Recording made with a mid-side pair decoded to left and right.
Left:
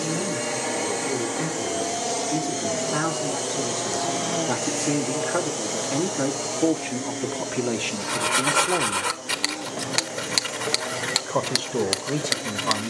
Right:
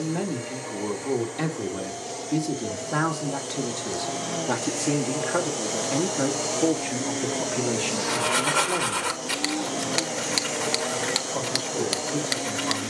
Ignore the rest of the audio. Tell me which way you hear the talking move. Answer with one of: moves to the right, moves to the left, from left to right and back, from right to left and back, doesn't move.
moves to the left.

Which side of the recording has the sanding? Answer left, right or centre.
centre.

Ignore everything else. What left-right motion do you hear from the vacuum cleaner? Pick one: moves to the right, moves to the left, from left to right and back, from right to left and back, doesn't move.
moves to the right.